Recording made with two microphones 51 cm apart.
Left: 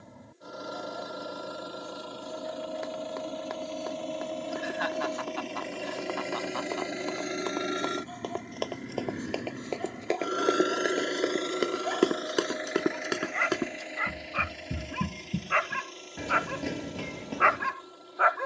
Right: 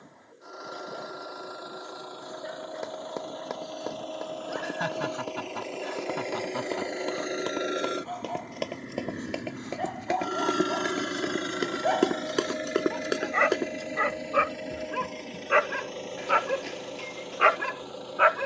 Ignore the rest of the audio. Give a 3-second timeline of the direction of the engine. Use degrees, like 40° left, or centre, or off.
50° left, 40° left, 20° left, 20° right, 60° right, 80° right.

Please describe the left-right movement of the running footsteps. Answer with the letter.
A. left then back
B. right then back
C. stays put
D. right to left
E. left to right
D.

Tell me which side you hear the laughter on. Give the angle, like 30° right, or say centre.
60° right.